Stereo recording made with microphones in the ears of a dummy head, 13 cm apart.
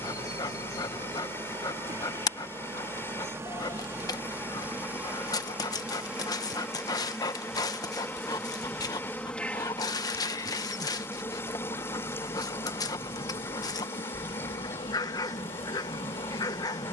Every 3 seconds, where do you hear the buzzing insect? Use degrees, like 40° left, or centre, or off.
30° right, 20° right, centre, 20° left, 30° left, 40° left.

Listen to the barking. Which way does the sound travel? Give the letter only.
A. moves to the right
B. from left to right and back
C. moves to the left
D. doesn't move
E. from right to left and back
D.